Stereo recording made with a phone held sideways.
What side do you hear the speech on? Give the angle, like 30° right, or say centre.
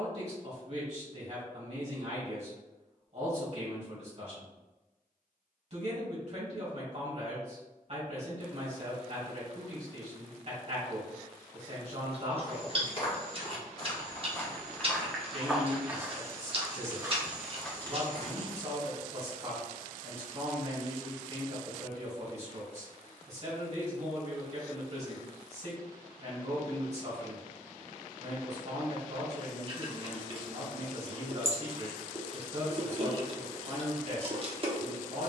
50° right.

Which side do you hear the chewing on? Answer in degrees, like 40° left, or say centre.
40° right.